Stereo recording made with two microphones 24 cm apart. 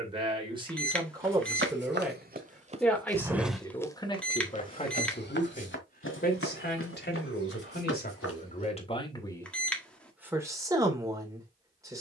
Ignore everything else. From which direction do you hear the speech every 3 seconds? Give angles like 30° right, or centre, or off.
10° right, 20° left, 40° left, 10° right.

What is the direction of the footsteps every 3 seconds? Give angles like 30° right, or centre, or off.
50° right, 30° left, 60° left, off.